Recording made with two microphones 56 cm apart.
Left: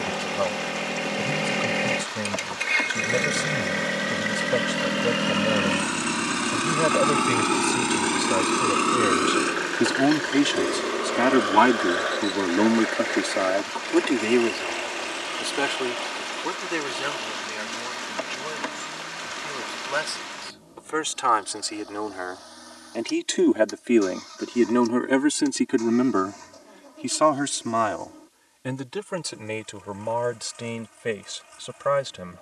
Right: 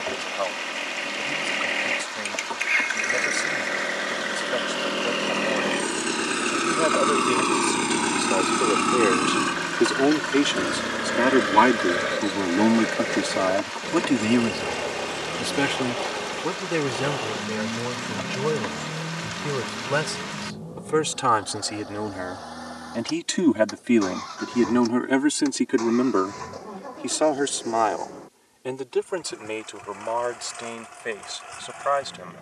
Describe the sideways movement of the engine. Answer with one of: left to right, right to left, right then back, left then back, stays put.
left to right.